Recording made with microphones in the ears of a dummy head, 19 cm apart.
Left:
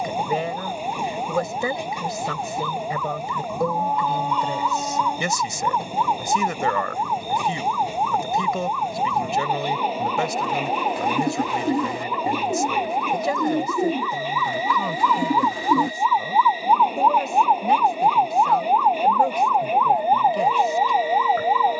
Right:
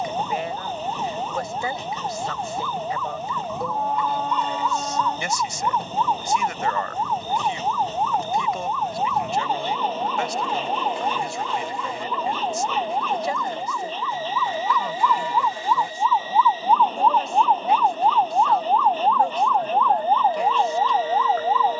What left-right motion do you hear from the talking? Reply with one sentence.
In this clip you hear the talking stay in one place.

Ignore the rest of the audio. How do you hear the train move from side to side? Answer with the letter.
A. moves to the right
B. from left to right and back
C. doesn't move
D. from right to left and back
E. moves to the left
C.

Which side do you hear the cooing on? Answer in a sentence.
In this clip you hear the cooing on the left.